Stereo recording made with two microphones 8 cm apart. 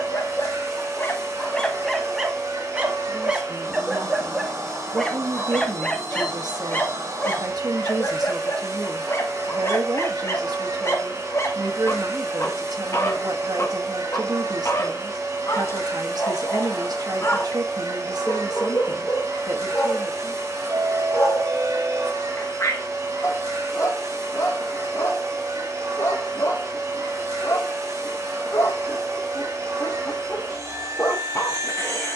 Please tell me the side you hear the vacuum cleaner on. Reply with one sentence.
You can hear the vacuum cleaner on the right.